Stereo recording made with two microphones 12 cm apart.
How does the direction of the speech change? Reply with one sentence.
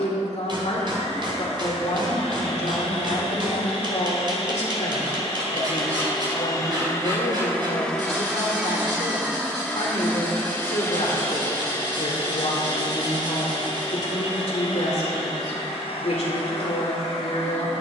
You can hear the speech stay put.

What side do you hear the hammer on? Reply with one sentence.
In this clip you hear the hammer on the right.